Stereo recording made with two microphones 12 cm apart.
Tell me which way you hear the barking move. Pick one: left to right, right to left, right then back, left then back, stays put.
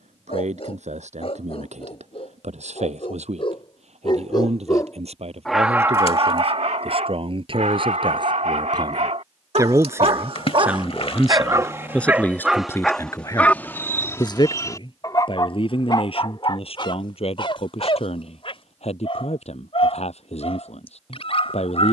right then back.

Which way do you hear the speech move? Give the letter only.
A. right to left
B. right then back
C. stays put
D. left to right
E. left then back
A.